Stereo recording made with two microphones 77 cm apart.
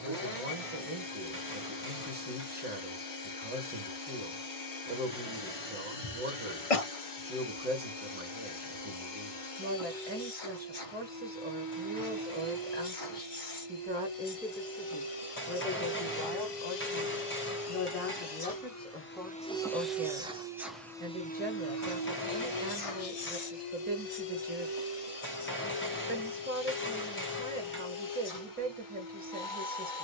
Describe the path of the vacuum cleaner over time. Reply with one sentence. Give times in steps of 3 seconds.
In this clip you hear the vacuum cleaner on the left from 0 s, in the centre from 18 s and on the left from 21 s.